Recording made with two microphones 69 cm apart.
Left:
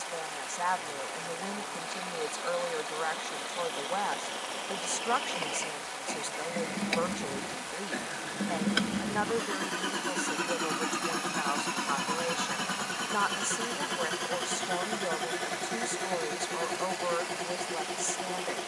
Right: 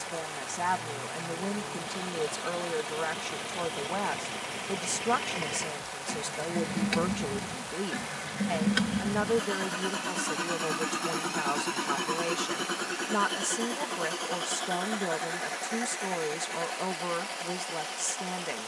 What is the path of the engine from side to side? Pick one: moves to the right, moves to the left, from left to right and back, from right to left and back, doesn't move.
moves to the left.